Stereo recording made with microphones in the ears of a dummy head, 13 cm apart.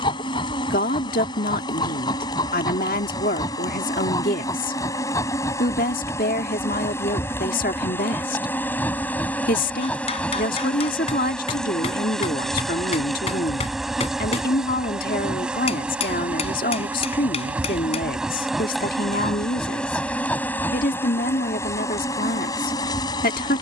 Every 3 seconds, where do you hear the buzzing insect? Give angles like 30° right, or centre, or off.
30° left, 30° left, 20° left, 10° left, centre, 10° right, centre, 30° left.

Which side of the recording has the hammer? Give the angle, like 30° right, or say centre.
50° left.